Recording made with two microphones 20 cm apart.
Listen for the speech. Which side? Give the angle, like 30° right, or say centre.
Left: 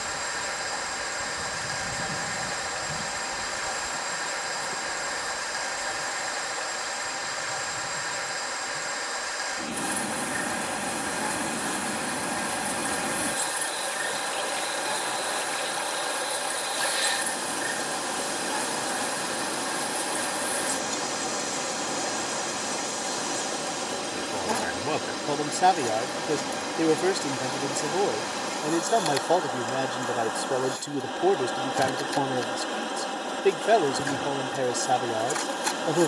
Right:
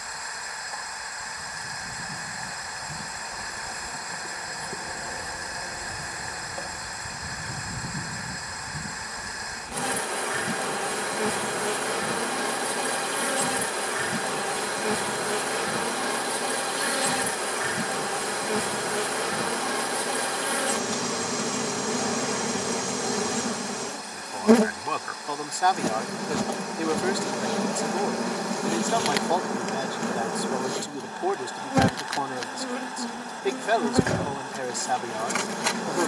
20° left.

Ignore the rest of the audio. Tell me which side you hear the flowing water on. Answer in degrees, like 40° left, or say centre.
80° left.